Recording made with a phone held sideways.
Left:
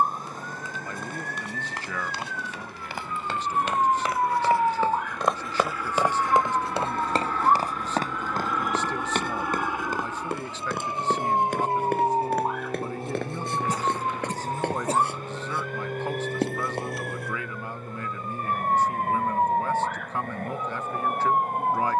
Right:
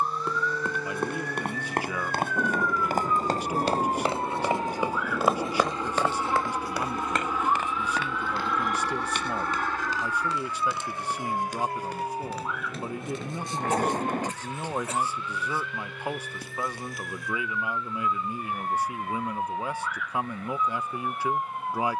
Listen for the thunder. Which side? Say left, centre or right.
right.